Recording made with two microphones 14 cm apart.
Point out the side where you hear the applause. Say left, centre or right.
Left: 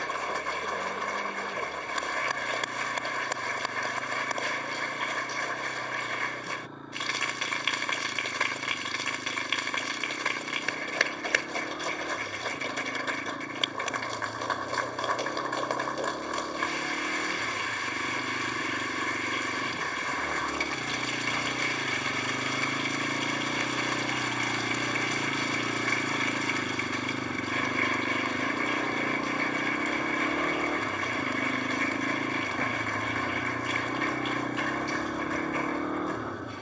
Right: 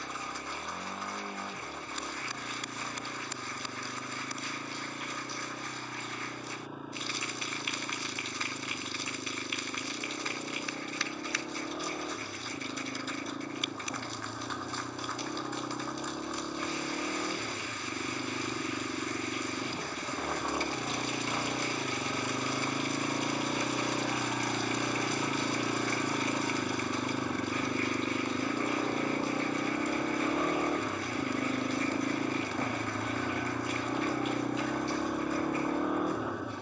left.